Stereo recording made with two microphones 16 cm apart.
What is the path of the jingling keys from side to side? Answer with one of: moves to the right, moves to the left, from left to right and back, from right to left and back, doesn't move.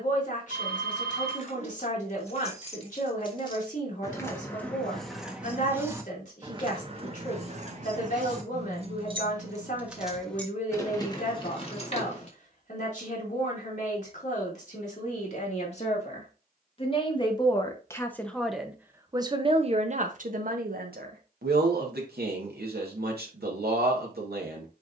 from left to right and back.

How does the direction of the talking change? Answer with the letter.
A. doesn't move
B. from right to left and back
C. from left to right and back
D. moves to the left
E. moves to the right
E.